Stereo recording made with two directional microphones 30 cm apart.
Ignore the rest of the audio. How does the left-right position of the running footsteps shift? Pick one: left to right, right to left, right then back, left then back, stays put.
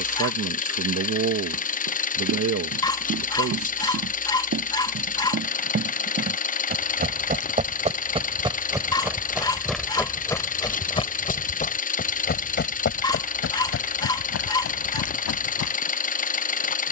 right to left.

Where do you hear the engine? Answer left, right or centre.
left.